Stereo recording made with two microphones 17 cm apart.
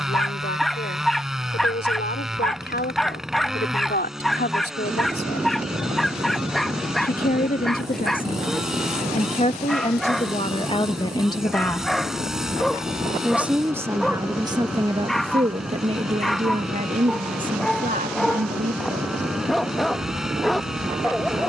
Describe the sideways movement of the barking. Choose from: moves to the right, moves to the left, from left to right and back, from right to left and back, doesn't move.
doesn't move.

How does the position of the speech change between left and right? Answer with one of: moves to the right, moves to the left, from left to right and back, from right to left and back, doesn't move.
moves to the right.